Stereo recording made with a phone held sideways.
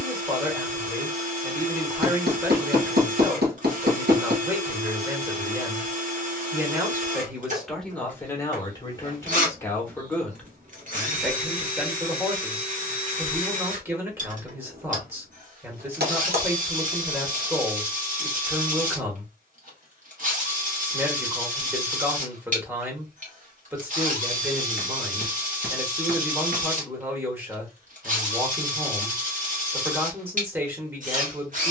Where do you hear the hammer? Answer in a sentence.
You can hear the hammer on the right.